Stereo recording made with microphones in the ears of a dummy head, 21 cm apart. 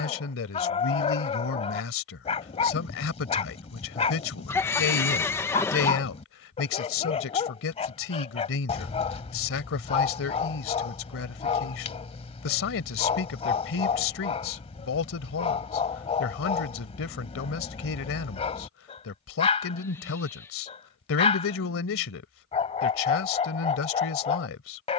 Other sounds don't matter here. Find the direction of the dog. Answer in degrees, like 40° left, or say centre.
30° left.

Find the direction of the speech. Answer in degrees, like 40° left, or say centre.
60° left.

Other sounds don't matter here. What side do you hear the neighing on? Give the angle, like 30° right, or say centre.
10° left.